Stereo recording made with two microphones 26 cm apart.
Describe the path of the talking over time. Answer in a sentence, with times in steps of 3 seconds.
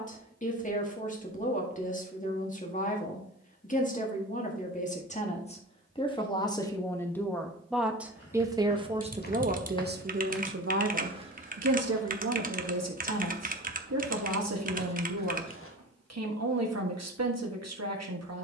In this clip you hear the talking on the left from 0 s, in the centre from 6 s and on the right from 9 s.